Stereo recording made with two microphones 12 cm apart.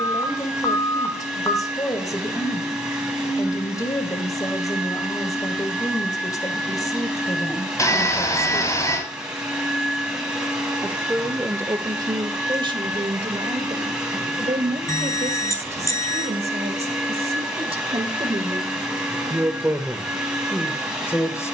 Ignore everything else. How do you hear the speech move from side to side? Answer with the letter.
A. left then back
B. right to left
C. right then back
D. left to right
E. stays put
C.